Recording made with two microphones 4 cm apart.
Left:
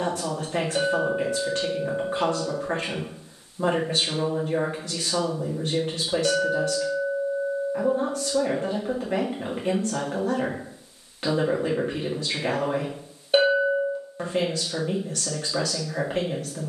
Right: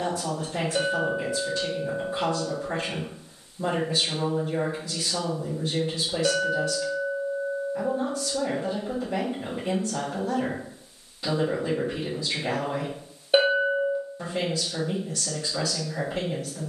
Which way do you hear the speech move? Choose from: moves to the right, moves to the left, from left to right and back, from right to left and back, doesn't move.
doesn't move.